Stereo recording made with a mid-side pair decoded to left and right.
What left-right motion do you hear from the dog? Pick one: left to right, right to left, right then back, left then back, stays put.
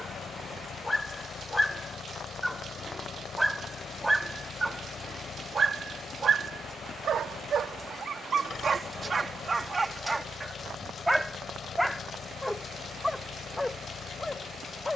right then back.